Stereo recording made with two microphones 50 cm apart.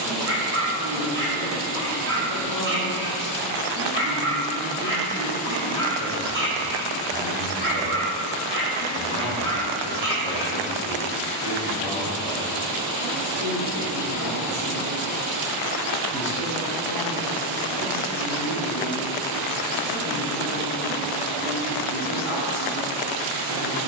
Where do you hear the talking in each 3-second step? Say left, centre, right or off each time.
right, right, right, right, right, left, left, left.